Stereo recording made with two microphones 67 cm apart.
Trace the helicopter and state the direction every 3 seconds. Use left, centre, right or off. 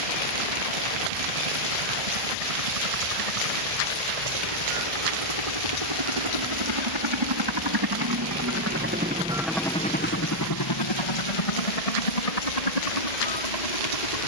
right, right, right, left, left.